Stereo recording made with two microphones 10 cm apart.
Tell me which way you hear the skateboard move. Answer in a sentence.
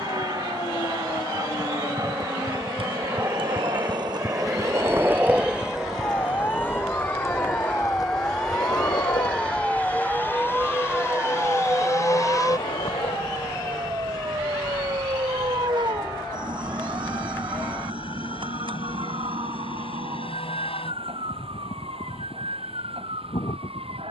You can hear the skateboard move to the left.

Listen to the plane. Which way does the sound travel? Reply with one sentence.
You can hear the plane move to the left.